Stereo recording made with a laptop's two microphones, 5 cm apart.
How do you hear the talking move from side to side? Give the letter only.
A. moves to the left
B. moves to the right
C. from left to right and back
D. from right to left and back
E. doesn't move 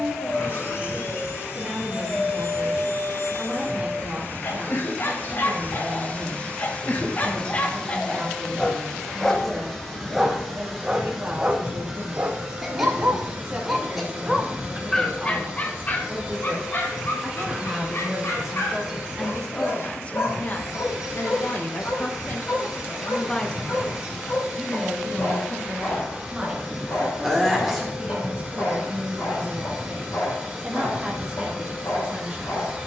D.